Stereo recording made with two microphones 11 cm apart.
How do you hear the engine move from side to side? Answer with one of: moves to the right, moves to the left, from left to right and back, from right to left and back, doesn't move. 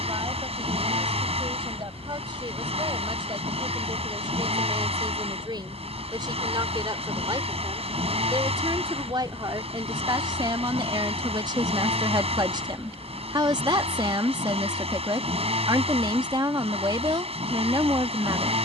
doesn't move.